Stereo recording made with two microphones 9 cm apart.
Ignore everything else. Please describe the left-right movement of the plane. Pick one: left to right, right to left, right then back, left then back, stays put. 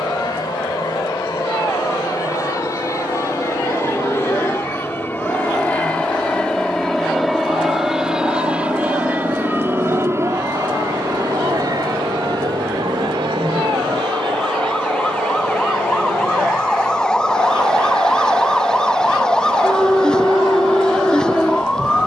left to right.